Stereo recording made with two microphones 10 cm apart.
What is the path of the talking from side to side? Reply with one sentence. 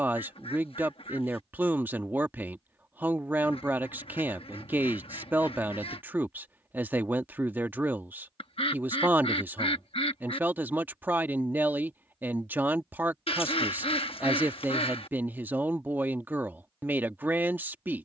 In this clip you hear the talking stay put.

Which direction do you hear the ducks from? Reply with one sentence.
You can hear the ducks on the left.